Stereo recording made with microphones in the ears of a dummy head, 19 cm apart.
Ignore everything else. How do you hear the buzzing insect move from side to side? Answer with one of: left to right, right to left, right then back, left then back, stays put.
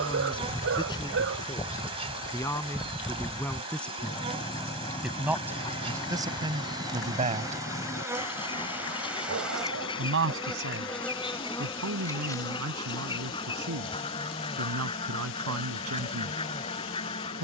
right to left.